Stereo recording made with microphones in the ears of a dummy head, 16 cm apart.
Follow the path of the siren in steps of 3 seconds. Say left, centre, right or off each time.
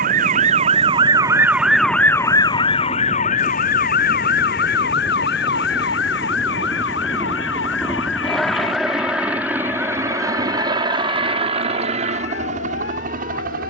centre, left, left, left, left.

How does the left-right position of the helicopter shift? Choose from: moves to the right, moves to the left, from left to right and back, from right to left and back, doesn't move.
moves to the right.